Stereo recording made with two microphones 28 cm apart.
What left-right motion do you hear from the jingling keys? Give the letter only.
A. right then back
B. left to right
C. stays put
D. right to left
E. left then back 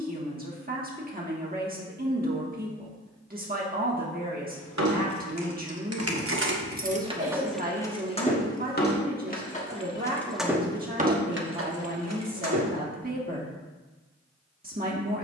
E.